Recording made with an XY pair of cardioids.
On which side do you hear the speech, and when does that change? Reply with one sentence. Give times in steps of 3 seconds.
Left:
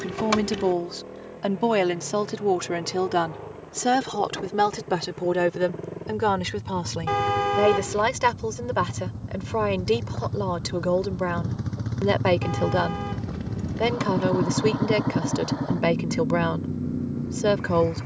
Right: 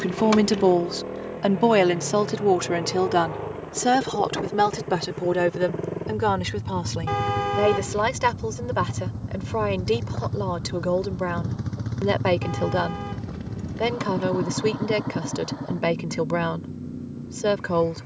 You can hear the speech on the right from 0 s and in the centre from 3 s.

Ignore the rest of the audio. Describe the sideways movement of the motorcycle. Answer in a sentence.
You can hear the motorcycle move from right to left.